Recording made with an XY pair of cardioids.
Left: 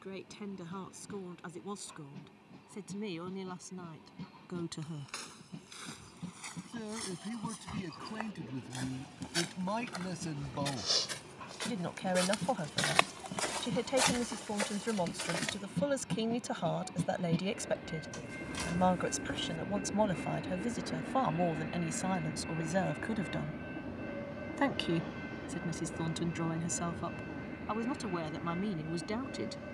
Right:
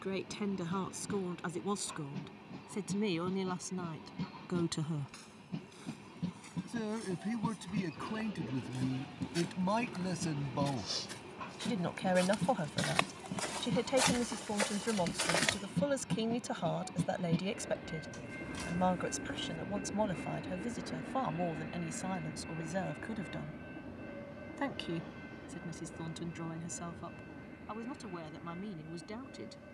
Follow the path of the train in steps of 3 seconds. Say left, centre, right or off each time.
right, right, right, right, right, centre, centre, left, left, left.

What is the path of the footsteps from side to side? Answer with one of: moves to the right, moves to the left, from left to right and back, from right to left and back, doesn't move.
moves to the right.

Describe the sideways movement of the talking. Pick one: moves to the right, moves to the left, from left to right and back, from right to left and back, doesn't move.
moves to the left.